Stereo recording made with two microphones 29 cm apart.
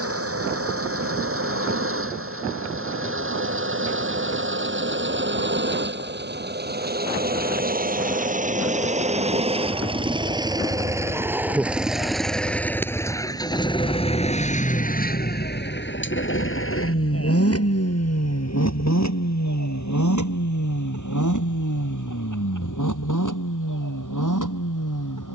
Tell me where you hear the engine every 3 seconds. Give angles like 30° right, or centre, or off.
50° right, 40° right, 30° right, 10° right, 10° left, 40° left, 60° left, 70° left, 80° left.